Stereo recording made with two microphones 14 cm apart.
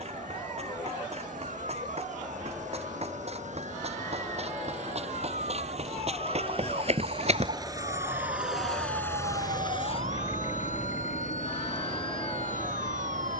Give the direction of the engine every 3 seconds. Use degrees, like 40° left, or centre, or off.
60° right, 60° right, 30° right, 50° left, 80° left.